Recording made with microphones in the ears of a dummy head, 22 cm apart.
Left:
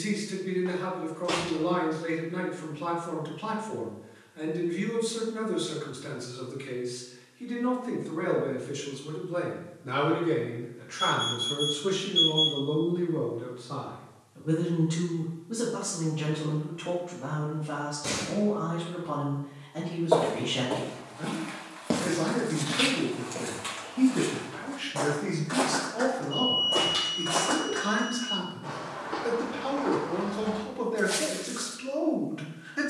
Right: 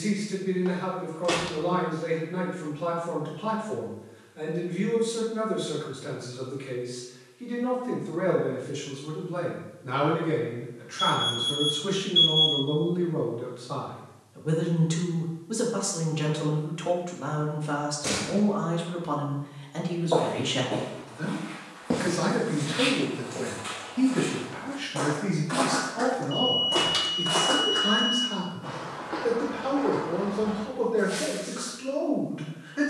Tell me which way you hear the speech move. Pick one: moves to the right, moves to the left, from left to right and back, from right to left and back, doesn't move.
from left to right and back.